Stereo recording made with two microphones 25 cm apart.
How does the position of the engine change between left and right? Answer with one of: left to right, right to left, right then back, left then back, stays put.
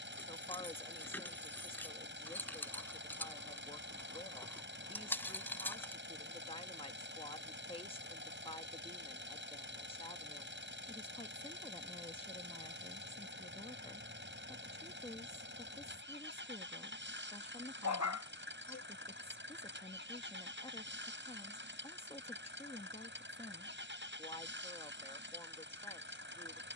stays put.